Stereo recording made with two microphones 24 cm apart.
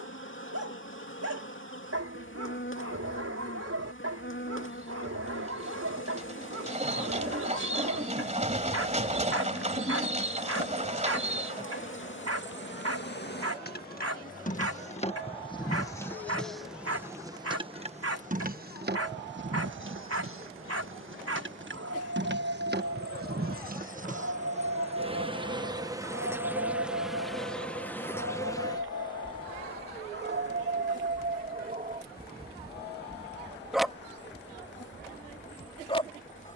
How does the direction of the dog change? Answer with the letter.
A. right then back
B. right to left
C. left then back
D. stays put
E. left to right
B.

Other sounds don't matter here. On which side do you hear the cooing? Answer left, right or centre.
right.